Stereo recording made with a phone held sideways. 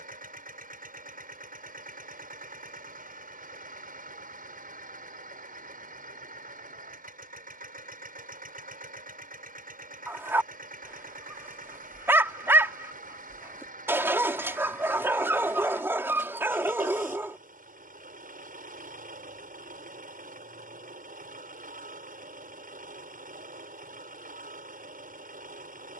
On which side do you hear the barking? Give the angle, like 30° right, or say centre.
20° right.